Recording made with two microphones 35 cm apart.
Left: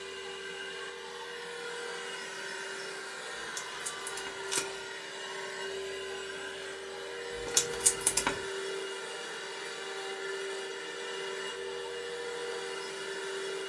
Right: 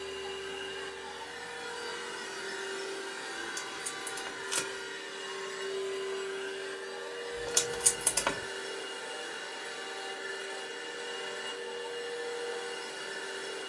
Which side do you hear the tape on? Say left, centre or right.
left.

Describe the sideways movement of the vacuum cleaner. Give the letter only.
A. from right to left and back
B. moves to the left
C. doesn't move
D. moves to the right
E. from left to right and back
B.